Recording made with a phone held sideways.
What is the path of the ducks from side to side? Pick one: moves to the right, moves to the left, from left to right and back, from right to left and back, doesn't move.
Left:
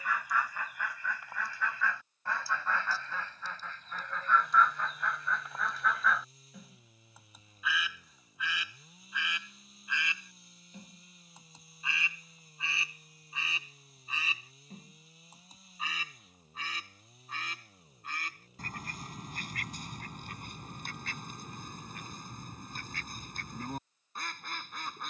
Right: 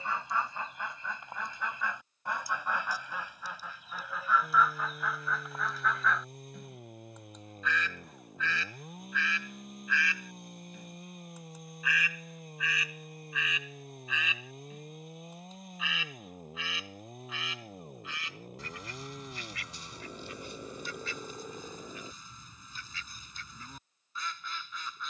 moves to the left.